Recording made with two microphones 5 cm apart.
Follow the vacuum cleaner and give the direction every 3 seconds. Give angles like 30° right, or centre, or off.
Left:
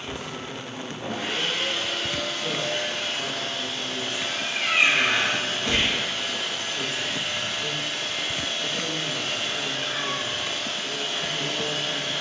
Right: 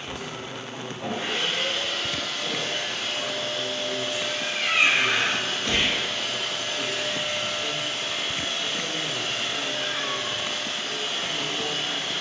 centre, 40° left, 10° right, 20° right.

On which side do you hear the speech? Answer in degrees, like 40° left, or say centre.
20° left.